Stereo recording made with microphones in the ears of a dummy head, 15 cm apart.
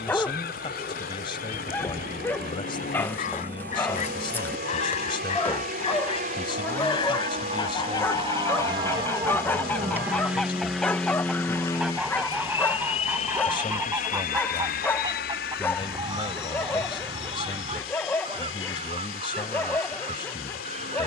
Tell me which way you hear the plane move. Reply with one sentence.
In this clip you hear the plane move from right to left.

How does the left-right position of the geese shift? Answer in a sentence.
You can hear the geese go from the left side to the right.